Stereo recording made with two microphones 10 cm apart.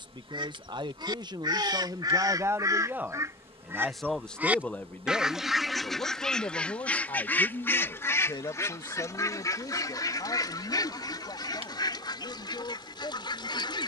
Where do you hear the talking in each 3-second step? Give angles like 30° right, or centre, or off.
40° right, 10° left, 40° left, 60° left, 60° left.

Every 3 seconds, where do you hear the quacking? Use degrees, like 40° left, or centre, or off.
50° right, 10° right, 20° left, 40° left, 50° left.